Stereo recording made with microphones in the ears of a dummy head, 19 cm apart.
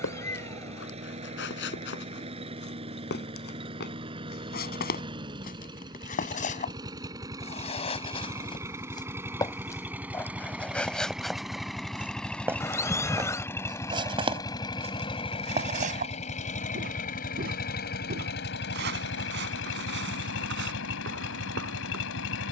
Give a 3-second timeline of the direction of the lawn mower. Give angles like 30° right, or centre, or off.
30° right, 20° right, 20° right, 10° right, 10° left, 30° left, 60° left, 60° left.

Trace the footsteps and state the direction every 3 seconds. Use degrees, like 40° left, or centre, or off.
50° left, 50° left, 30° left, 10° left, 20° right, 40° right, 50° right, 60° right.